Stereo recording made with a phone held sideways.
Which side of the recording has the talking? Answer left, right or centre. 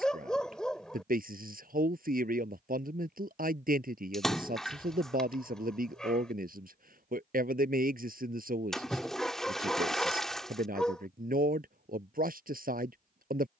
right.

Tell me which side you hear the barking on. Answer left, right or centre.
centre.